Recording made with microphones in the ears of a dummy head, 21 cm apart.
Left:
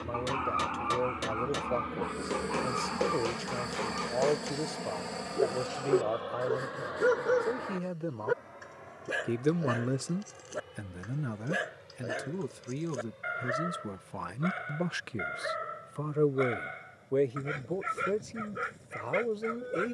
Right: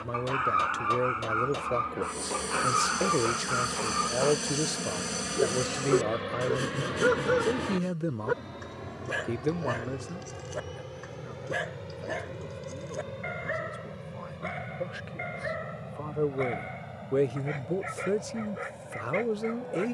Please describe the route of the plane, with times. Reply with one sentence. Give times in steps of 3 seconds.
In this clip you hear the plane on the left from 0 s, in the centre from 3 s and on the right from 6 s.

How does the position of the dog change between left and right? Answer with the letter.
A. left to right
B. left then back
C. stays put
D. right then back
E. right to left
E.